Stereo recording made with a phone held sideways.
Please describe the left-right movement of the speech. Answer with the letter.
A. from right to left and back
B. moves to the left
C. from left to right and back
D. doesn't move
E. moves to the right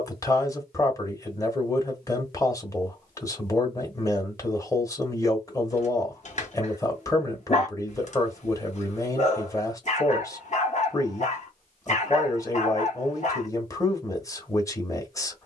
D.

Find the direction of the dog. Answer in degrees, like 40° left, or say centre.
50° left.